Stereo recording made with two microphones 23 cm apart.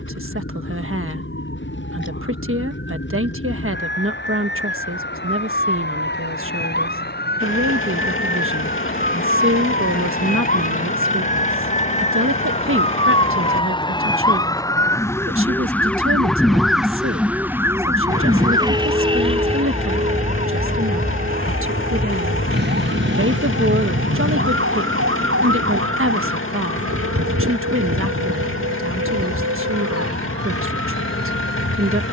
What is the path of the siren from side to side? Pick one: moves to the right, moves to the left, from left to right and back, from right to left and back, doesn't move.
moves to the right.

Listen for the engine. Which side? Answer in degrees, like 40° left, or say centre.
60° left.